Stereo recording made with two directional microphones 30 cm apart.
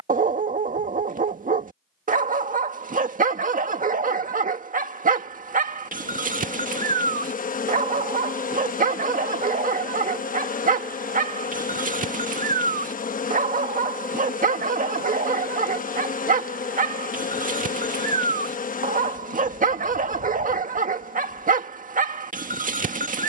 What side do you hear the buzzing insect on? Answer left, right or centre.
left.